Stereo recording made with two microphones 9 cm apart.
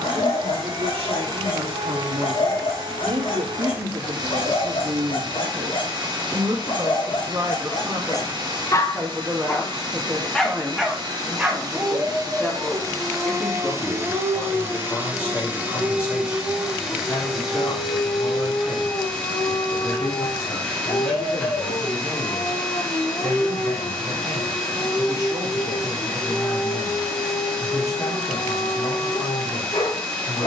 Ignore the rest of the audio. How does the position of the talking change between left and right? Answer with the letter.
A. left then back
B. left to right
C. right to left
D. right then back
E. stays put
C.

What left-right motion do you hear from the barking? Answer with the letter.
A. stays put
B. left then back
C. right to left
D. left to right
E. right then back
E.